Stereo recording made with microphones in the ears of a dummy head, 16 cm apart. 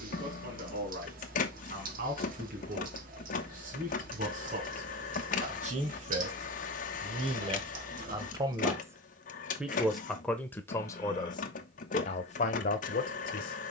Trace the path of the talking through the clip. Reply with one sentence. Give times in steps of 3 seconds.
You can hear the talking on the right from 0 s, in the centre from 9 s and on the left from 12 s.